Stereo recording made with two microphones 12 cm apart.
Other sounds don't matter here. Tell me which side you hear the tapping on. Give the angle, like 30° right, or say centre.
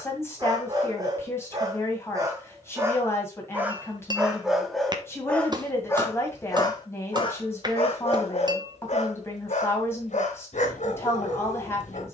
30° right.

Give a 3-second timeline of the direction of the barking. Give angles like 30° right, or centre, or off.
30° right, centre, 40° left, 70° left.